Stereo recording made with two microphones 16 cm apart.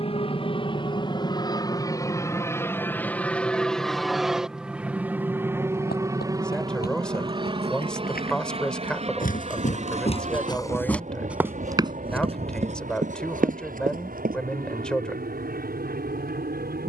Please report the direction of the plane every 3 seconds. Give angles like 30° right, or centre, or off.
30° left, centre, 30° right, 40° right, 50° right, 60° right.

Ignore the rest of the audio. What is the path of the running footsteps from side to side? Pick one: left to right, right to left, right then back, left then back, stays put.
left to right.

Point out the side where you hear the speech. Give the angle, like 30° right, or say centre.
10° left.